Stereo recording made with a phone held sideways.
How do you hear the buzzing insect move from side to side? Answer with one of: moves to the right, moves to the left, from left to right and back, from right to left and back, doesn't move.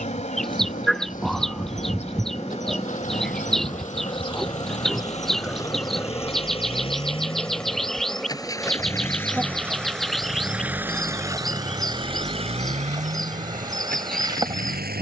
moves to the right.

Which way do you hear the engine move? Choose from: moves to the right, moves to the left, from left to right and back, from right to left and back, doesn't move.
moves to the right.